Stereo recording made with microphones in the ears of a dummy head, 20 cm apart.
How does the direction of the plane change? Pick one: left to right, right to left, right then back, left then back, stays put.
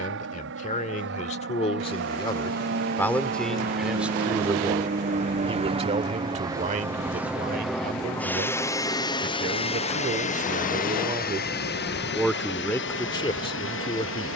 right to left.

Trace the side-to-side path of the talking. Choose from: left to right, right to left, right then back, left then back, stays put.
right then back.